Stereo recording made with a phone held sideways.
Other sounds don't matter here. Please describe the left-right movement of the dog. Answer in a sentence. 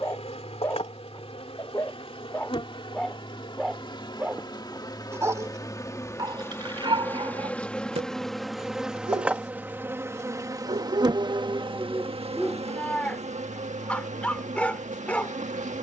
In this clip you hear the dog move from left to right and back again.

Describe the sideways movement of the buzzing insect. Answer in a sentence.
In this clip you hear the buzzing insect move to the right.